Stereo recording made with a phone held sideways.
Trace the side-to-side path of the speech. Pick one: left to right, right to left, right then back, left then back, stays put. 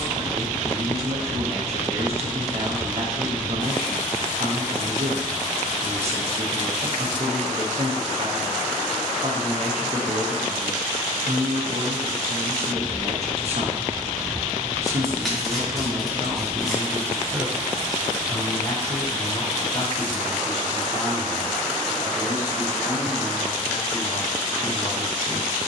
right to left.